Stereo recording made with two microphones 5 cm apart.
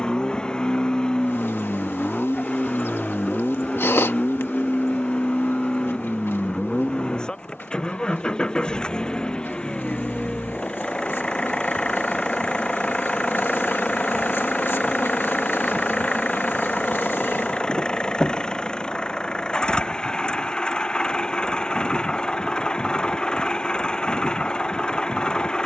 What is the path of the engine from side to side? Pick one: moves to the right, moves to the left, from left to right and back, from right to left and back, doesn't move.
doesn't move.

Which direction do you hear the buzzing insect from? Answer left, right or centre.
left.